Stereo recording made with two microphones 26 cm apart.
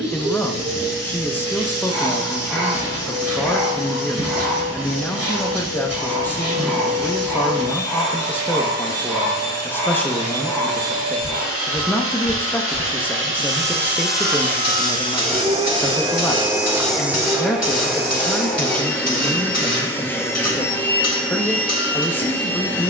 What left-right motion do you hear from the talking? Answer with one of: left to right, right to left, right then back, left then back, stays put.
stays put.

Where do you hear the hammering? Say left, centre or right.
left.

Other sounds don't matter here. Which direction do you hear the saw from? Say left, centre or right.
centre.